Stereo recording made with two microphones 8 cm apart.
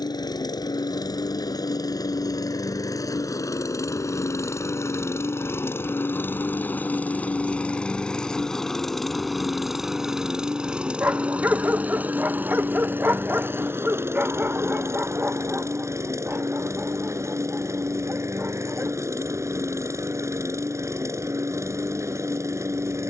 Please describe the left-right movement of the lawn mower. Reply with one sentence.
In this clip you hear the lawn mower move to the right.